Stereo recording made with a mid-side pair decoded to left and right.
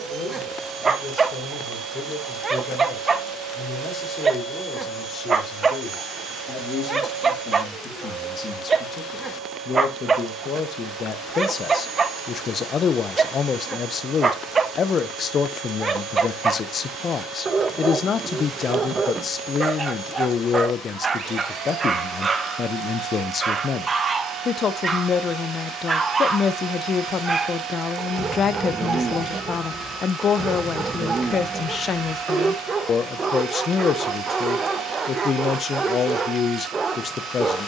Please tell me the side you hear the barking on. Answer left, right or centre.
right.